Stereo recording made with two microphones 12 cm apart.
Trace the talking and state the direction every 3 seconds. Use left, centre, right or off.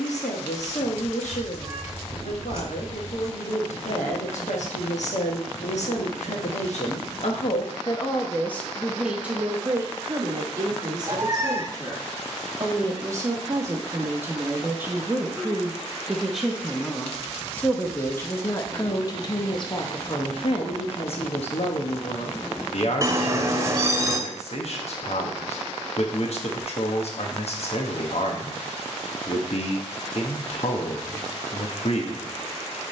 left, left, left, right, right, centre, left, left, left, left, left.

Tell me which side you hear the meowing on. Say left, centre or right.
right.